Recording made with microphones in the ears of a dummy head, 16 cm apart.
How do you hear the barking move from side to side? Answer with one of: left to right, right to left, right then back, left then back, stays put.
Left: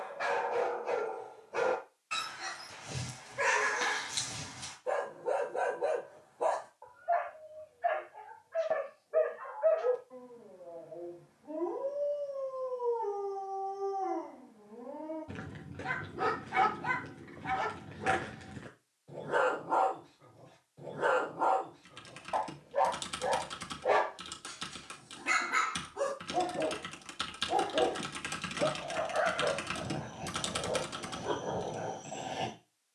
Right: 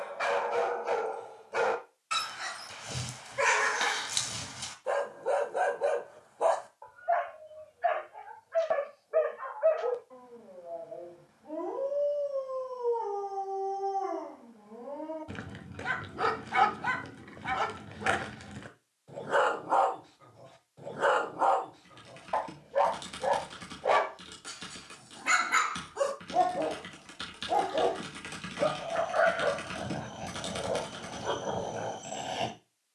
stays put.